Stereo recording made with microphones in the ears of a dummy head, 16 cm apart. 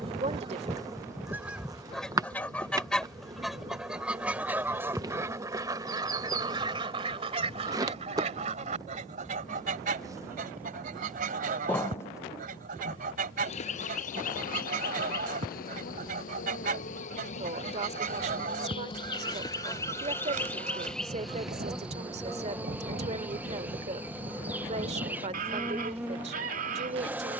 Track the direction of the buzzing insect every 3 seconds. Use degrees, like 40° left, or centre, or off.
20° right, 20° right, 20° right, 10° right, 40° left, 50° left, 20° left, 10° right, 10° right.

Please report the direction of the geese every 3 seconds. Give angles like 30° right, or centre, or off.
10° right, 10° right, 30° right, 40° right, 50° right, 50° right, 50° right, 50° right, 50° right.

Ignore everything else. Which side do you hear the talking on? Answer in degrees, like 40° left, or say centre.
40° right.